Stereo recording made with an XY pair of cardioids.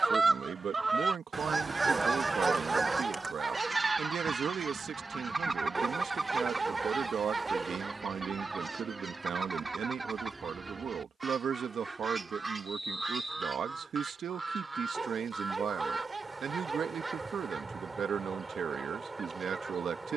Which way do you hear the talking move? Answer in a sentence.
In this clip you hear the talking stay in one place.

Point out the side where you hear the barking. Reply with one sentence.
In this clip you hear the barking on the right.